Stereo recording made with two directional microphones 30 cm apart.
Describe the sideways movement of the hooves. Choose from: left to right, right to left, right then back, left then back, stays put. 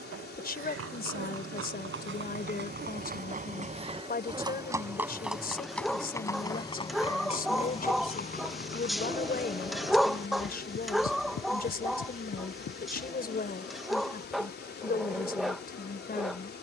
right to left.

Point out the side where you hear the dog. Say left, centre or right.
centre.